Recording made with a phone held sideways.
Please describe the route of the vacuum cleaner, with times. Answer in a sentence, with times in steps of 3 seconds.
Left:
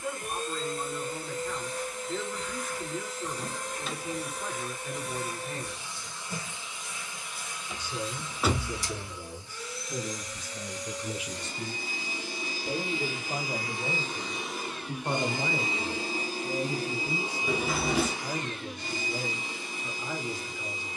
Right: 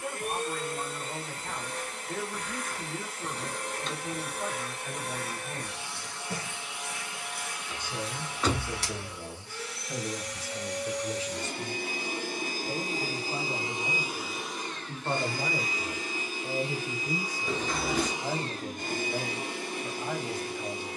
In this clip you hear the vacuum cleaner on the right from 0 s, on the left from 15 s and on the right from 18 s.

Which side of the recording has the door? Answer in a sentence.
You can hear the door in the centre.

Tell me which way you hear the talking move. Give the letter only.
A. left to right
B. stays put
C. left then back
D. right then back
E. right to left
C.